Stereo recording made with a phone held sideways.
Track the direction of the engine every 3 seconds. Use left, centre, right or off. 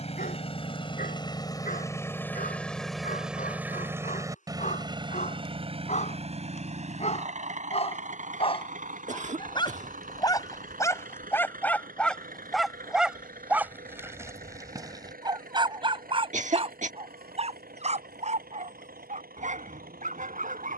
left, right, right, right, right, right, right.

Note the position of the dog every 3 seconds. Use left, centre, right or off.
left, left, left, left, centre, right, right.